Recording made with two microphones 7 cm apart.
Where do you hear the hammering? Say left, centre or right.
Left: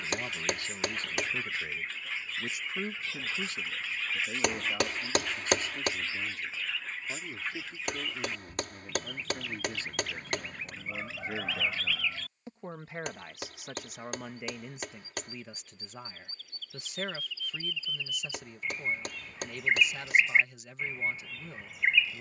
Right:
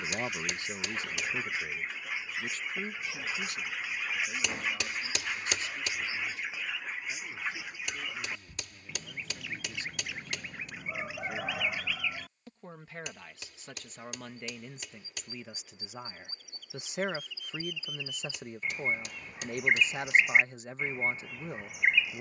left.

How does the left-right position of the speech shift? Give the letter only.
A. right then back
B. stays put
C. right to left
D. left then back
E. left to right
D.